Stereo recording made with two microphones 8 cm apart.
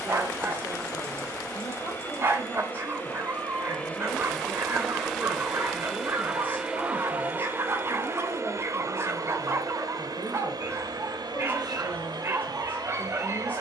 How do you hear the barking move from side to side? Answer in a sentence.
In this clip you hear the barking stay put.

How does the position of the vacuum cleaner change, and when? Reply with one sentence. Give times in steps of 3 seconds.
You can hear the vacuum cleaner on the left from 0 s, in the centre from 3 s and on the right from 6 s.